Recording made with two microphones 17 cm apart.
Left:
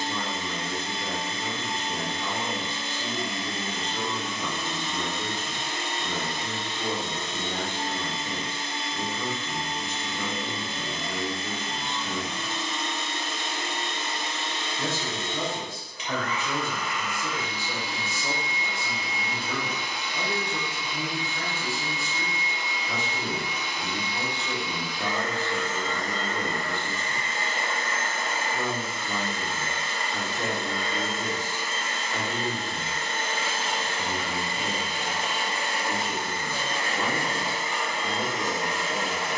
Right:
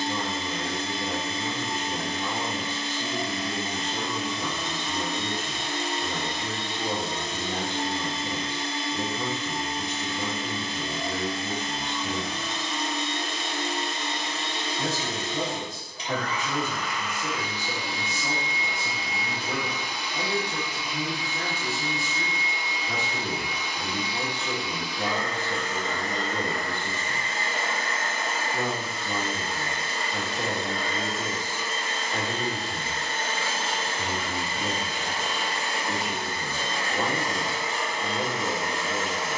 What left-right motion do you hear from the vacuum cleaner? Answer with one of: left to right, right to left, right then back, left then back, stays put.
stays put.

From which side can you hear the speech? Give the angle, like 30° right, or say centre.
20° right.